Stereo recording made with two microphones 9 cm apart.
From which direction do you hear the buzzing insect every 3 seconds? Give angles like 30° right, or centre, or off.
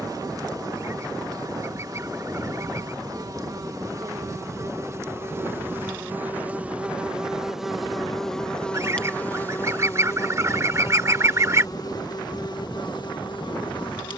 40° right, 30° right, centre, 30° left, 50° left.